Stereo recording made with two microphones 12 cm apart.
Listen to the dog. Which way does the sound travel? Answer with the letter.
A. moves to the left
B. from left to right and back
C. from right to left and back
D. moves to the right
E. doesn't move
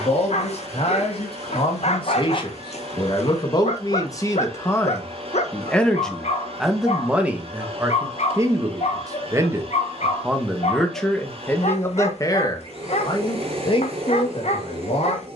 E.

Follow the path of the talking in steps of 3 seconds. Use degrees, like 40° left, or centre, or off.
50° left, 20° left, 10° right, centre, 50° left.